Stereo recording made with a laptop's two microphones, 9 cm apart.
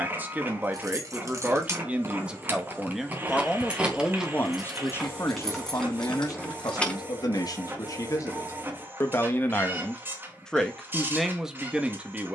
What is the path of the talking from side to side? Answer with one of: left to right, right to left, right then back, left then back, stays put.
left then back.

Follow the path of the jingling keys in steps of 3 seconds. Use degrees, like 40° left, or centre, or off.
30° right, 10° right, 10° left, off.